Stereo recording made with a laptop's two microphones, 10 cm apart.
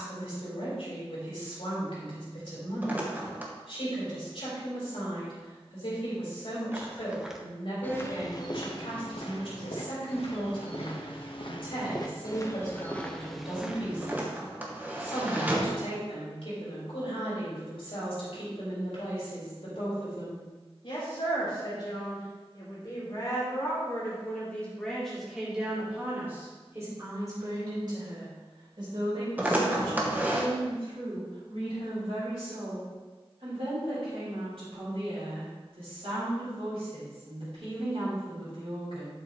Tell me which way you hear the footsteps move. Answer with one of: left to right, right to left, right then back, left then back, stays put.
left then back.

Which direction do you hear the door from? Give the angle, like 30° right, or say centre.
20° right.